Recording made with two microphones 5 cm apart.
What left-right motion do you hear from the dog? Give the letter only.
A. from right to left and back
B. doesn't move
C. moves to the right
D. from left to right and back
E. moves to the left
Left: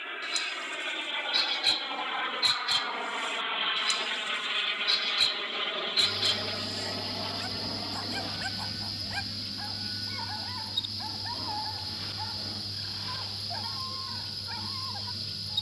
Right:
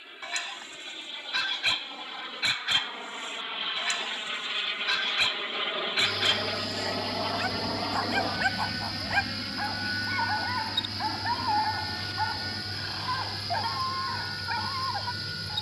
B.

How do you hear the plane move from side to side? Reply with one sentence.
You can hear the plane move from left to right.